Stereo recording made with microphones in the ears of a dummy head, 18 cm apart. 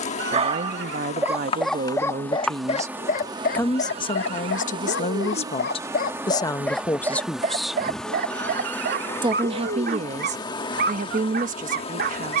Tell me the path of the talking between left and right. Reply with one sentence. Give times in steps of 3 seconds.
You can hear the talking on the right from 0 s, on the left from 3 s, in the centre from 6 s and on the right from 9 s.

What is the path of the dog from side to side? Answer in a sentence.
You can hear the dog move from right to left and back again.